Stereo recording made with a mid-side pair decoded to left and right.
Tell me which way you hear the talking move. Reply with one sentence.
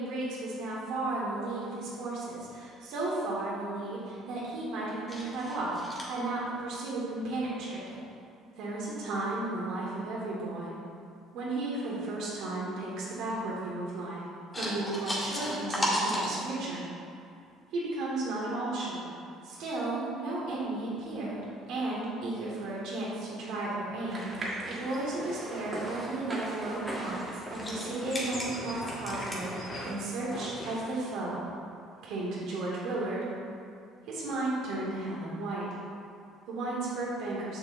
In this clip you hear the talking stay in one place.